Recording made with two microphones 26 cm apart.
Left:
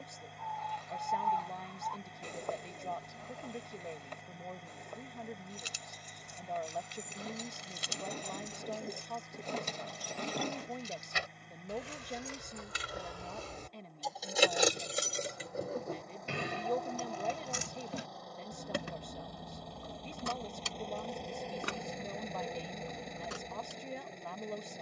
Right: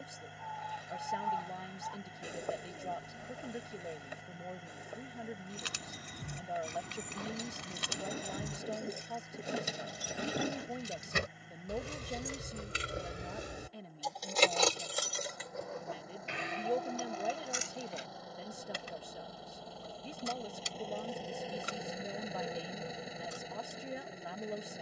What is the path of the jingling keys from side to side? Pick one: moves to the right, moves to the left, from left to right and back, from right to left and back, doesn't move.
moves to the left.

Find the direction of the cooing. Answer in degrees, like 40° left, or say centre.
10° right.